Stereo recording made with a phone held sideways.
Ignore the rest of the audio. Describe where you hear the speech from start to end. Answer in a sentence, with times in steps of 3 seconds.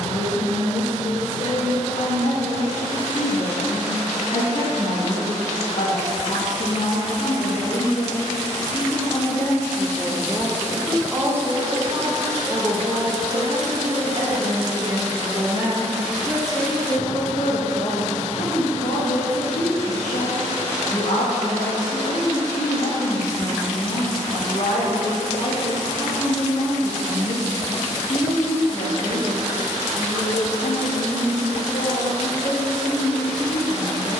You can hear the speech on the left from 0 s, in the centre from 9 s, on the right from 12 s, in the centre from 15 s and on the left from 18 s.